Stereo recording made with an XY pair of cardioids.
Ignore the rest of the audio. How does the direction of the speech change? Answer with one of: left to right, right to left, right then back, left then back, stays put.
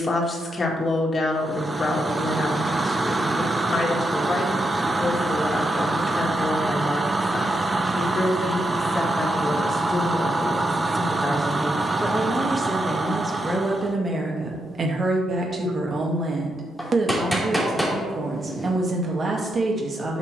left to right.